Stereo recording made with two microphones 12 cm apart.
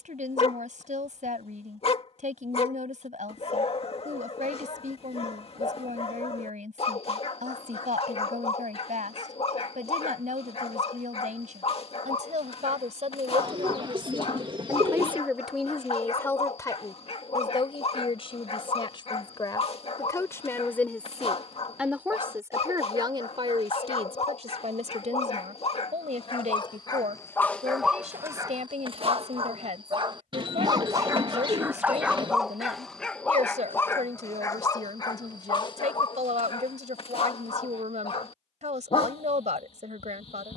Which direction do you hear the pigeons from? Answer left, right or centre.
right.